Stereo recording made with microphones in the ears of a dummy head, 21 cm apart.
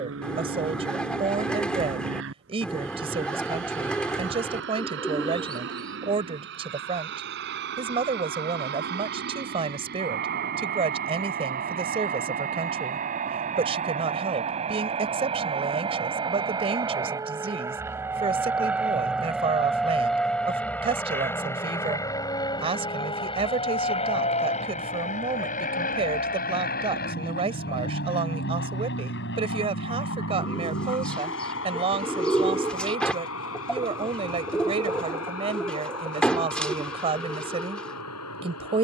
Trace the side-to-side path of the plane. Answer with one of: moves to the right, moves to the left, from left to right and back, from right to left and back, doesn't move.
moves to the left.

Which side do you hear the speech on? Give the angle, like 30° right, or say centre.
20° right.